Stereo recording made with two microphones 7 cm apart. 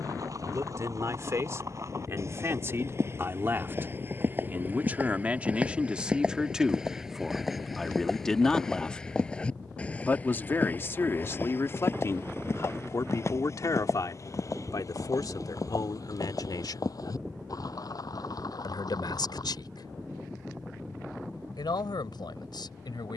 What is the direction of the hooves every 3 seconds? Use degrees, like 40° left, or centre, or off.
50° right, 30° right, centre, 20° left, 40° left, 50° left, 60° left, off.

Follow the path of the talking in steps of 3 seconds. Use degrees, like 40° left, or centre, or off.
40° right, 20° right, centre, 30° left, 50° left, 60° left, 70° left, 80° left.